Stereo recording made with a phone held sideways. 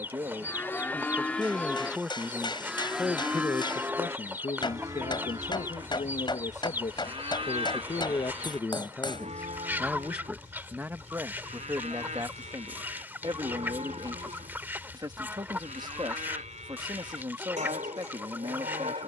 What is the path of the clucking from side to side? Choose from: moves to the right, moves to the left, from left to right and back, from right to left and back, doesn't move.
doesn't move.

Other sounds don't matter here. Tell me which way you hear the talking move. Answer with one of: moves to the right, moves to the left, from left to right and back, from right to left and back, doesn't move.
from right to left and back.